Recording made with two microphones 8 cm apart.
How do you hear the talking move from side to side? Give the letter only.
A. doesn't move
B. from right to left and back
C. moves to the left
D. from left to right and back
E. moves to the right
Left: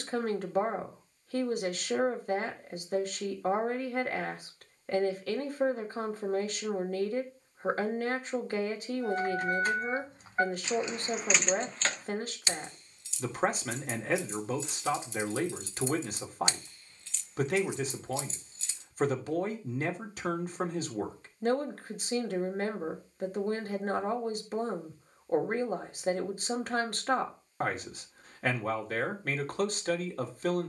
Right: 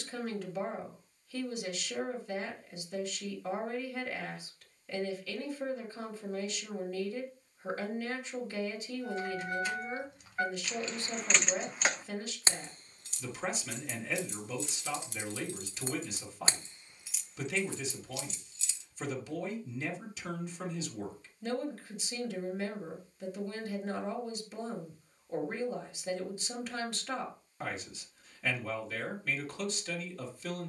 A.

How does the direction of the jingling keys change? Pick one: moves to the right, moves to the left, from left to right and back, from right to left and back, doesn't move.
from left to right and back.